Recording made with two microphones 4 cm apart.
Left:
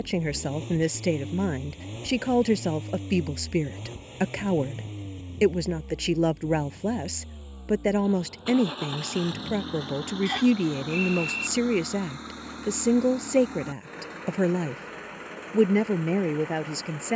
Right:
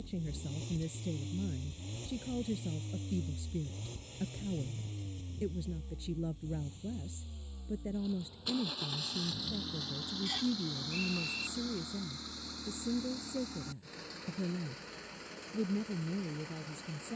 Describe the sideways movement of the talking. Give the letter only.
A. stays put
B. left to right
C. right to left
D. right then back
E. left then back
A.